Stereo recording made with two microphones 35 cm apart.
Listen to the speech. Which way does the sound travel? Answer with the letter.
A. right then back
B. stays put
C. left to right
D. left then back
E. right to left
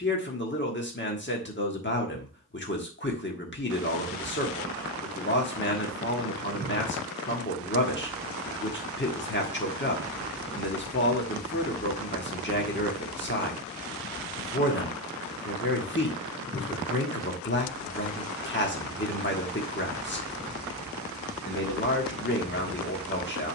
B.